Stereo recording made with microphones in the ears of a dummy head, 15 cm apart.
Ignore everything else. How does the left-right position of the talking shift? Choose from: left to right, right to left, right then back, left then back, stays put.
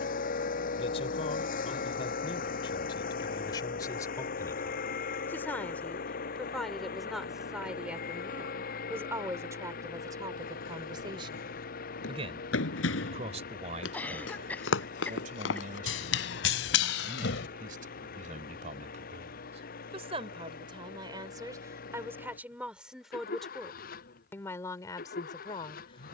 right then back.